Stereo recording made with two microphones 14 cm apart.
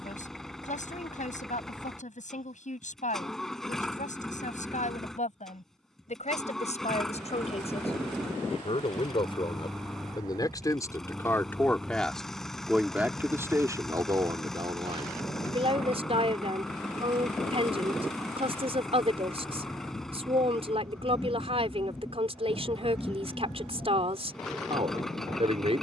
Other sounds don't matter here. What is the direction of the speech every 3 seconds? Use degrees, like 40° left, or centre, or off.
60° left, 60° left, 50° left, 20° left, 20° right, 40° right, 40° right, 40° right, 40° right.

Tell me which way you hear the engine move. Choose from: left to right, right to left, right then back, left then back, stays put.
stays put.